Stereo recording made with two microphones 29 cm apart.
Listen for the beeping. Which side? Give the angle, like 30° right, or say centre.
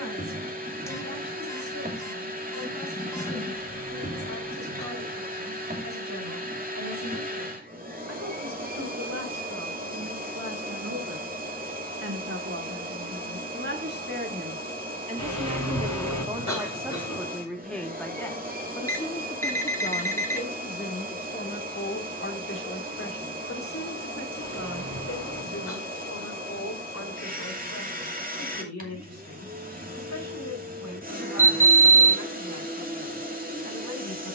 10° left.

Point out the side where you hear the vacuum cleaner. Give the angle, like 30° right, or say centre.
30° right.